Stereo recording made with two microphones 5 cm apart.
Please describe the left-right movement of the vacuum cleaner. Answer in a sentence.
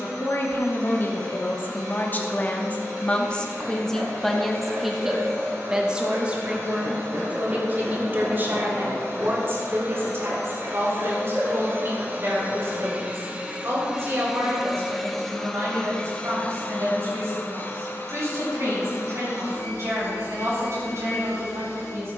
You can hear the vacuum cleaner travel towards the left.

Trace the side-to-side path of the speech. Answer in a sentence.
You can hear the speech go from the left side to the right.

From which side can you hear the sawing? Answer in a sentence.
You can hear the sawing on the right.